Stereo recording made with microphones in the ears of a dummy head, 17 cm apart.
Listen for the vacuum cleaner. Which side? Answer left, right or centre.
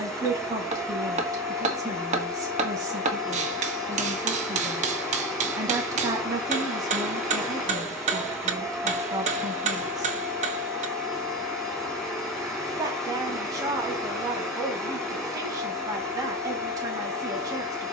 centre.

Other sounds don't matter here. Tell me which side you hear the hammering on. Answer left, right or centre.
right.